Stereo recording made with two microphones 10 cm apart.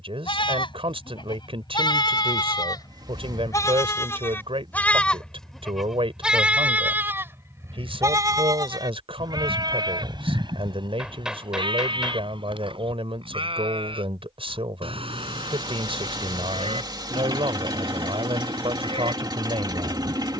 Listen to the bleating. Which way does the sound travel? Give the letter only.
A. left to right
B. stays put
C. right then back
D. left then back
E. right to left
A.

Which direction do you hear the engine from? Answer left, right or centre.
right.